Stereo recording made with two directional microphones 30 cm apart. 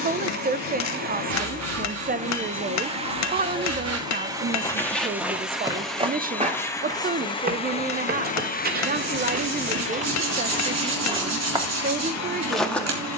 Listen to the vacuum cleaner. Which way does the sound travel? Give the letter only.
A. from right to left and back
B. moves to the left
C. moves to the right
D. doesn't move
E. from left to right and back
B.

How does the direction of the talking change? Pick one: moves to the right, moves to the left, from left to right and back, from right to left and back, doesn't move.
doesn't move.